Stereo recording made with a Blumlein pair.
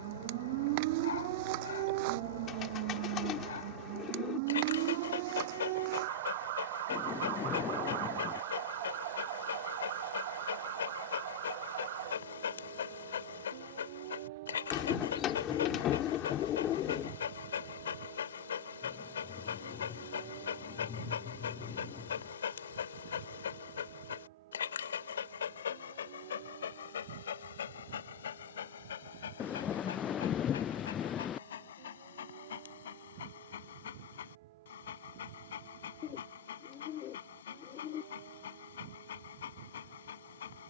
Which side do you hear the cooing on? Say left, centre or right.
left.